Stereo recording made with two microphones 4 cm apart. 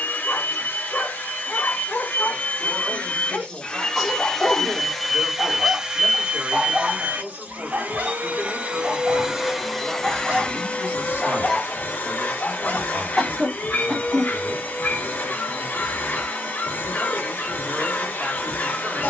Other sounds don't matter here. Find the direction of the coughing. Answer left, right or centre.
centre.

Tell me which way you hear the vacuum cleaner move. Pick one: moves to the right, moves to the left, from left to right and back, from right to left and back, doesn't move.
from left to right and back.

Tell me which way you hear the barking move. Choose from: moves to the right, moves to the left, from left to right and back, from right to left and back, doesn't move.
from left to right and back.